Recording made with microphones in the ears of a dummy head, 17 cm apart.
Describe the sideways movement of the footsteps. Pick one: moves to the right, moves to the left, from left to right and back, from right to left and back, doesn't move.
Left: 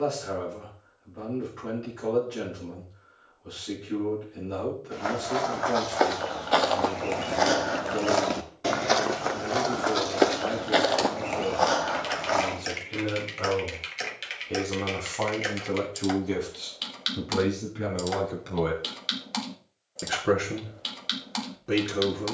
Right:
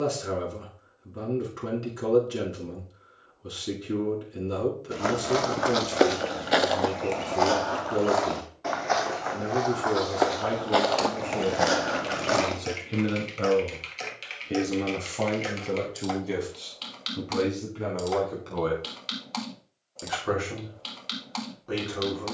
from right to left and back.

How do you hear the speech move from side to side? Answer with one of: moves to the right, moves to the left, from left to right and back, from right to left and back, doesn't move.
moves to the left.